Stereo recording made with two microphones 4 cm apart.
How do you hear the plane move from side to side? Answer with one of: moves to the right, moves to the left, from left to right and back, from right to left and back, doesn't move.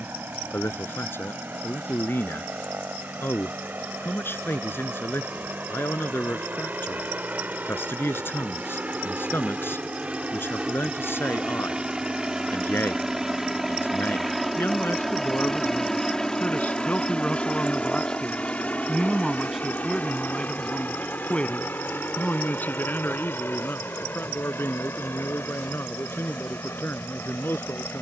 moves to the left.